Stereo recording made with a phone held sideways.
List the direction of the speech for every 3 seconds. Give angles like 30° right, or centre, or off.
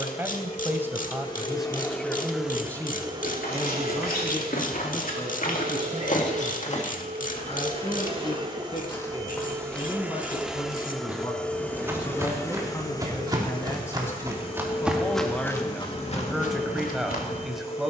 centre, 30° left, 40° left, 30° left, 20° left, centre.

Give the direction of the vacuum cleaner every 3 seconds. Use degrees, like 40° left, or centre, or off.
20° left, 50° right, 40° right, 10° right, 30° left, 50° left.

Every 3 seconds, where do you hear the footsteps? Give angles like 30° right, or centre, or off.
off, 70° left, 40° left, centre, 20° right, 50° left.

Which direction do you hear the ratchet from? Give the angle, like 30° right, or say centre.
60° left.